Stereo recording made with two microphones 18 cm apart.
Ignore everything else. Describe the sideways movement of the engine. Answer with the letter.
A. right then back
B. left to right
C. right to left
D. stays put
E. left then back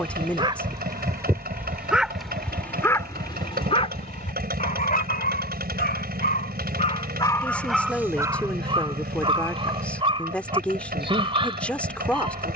D.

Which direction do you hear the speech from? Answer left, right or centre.
centre.